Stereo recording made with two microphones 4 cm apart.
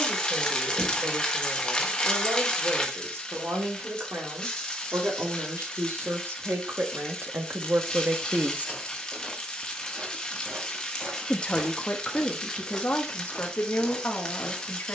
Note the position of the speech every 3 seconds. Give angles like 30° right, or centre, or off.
80° right, 70° right, 50° right, 30° left, 50° left.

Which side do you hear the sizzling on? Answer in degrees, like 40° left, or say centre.
20° left.